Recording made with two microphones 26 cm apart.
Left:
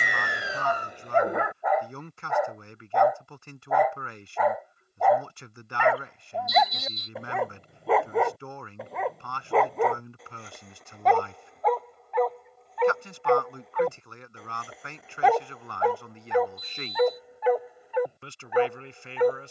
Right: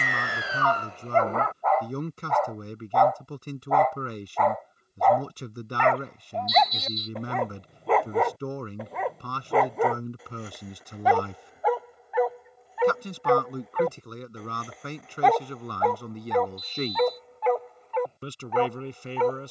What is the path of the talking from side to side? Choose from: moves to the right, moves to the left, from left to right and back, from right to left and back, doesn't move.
doesn't move.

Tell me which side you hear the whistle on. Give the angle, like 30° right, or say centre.
50° left.